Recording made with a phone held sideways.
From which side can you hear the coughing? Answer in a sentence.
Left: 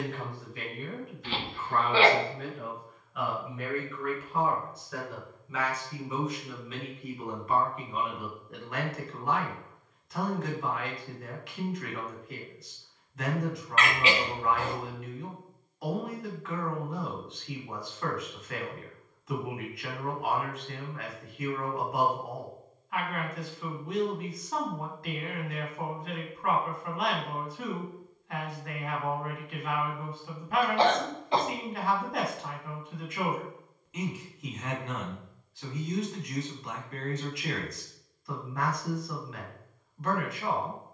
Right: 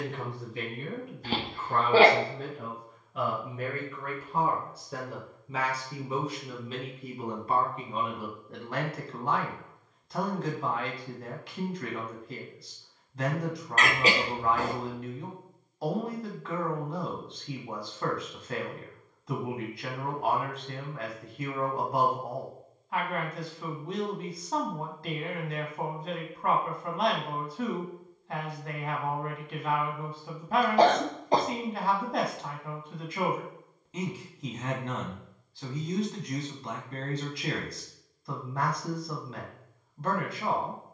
In this clip you hear the coughing on the right.